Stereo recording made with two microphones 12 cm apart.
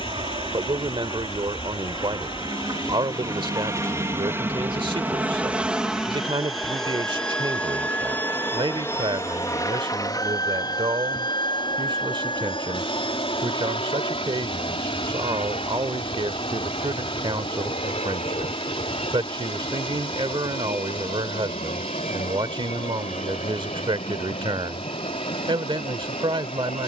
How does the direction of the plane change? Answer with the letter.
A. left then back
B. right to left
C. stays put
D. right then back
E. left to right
B.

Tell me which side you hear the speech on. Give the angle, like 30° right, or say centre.
40° right.